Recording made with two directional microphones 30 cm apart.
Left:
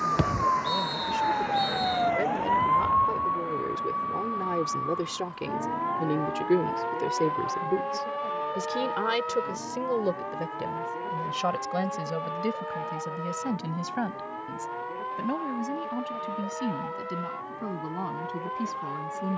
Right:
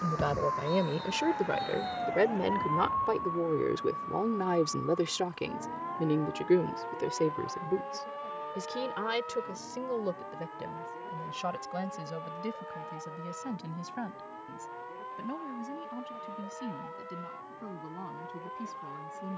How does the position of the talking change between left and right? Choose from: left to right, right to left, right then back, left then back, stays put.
right to left.